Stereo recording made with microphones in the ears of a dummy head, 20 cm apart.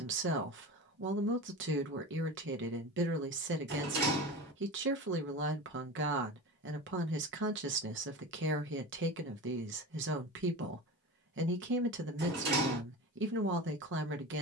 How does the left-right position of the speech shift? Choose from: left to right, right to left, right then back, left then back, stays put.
stays put.